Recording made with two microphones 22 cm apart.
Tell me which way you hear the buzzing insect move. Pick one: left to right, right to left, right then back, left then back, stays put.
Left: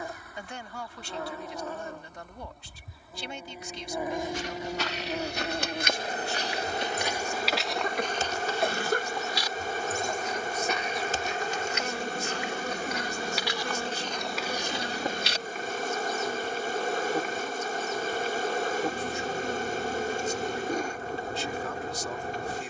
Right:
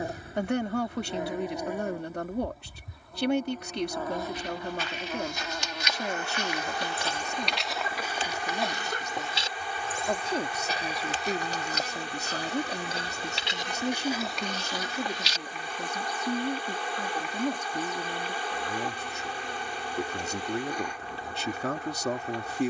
right to left.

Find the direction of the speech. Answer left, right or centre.
right.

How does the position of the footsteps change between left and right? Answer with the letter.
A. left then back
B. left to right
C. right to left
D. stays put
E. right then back
E.